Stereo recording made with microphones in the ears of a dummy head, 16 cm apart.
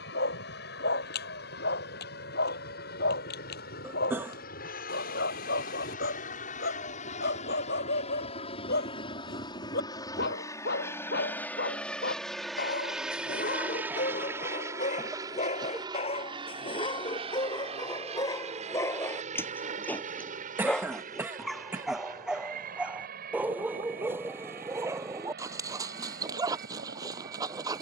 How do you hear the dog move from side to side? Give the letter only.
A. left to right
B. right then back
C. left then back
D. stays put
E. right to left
A.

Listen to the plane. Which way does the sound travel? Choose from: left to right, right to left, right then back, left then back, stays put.
left to right.